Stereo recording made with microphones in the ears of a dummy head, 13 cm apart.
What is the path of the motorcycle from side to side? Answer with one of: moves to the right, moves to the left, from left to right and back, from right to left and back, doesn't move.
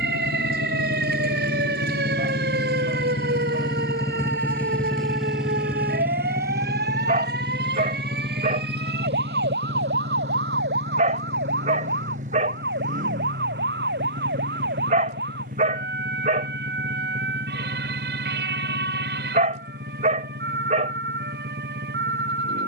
moves to the right.